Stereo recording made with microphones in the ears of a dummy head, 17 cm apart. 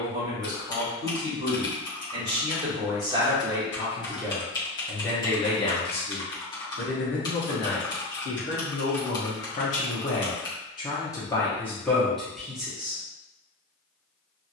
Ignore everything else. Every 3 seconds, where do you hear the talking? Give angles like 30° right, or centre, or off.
30° right, centre, 60° left, 30° left, centre.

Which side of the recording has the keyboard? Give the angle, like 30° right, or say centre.
20° left.